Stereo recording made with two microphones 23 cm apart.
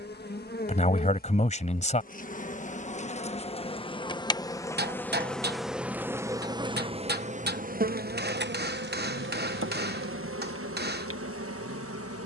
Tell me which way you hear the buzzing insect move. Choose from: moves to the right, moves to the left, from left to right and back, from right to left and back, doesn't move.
moves to the right.